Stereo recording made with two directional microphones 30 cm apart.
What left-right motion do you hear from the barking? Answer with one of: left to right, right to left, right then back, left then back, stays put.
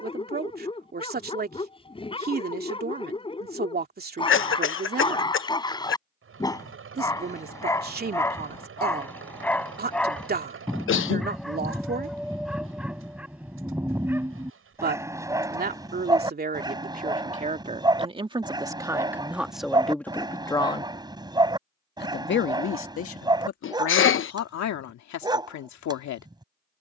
left to right.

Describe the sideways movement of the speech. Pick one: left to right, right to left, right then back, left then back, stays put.
right to left.